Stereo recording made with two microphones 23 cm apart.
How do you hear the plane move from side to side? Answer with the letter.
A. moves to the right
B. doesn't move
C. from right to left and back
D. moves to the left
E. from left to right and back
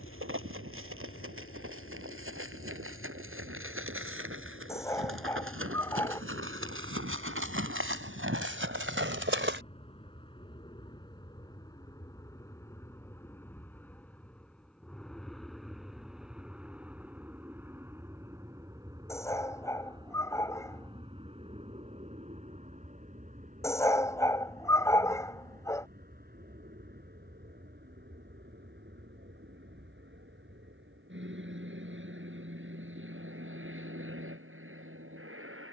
A.